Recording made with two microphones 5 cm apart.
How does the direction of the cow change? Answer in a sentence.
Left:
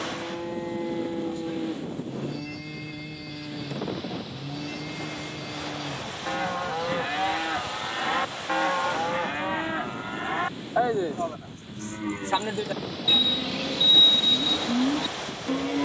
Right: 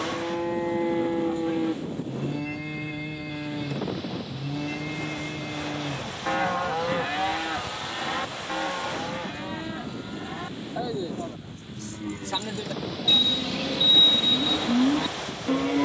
You can hear the cow move from right to left and back again.